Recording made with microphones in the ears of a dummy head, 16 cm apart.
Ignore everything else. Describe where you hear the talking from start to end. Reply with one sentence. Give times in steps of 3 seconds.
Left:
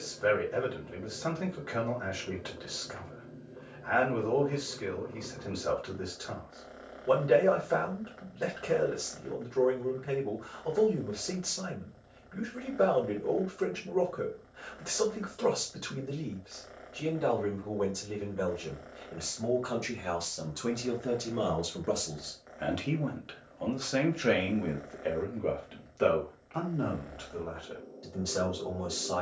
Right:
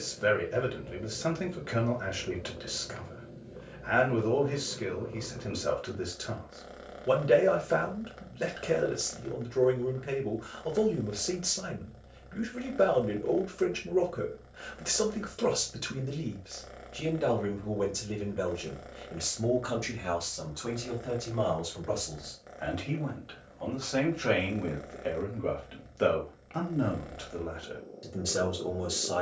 In this clip you hear the talking on the right from 0 s, in the centre from 18 s, on the left from 21 s, in the centre from 24 s and on the right from 27 s.